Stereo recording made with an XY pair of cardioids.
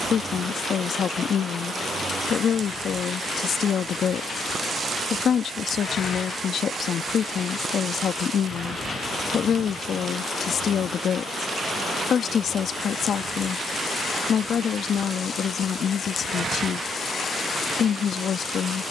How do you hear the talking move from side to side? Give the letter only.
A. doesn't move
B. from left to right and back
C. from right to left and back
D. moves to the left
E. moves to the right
A.